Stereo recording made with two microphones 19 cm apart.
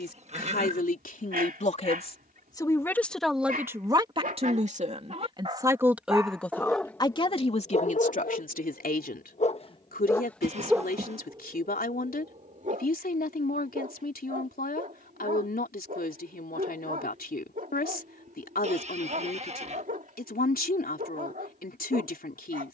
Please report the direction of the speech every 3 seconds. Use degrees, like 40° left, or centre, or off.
40° left, 20° right, 30° left, 50° left, 50° left, 50° left, 50° left, 50° left.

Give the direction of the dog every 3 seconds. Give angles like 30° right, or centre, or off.
50° right, 40° right, 30° left, centre, 40° right, 50° right, 50° right, 50° right.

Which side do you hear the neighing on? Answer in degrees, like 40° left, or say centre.
40° right.